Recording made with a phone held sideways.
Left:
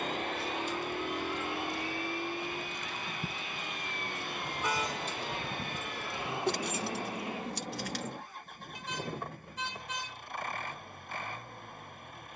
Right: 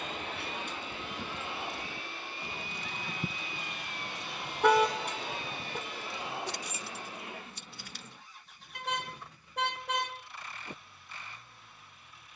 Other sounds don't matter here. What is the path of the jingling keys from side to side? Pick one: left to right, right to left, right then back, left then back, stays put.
right to left.